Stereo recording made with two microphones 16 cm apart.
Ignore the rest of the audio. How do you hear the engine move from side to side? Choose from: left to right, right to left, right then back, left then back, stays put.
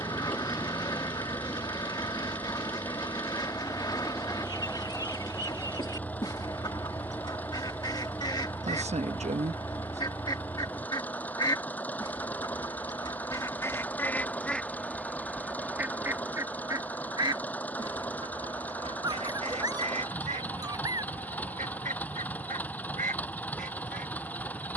stays put.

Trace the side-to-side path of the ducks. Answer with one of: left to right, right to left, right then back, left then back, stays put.
left to right.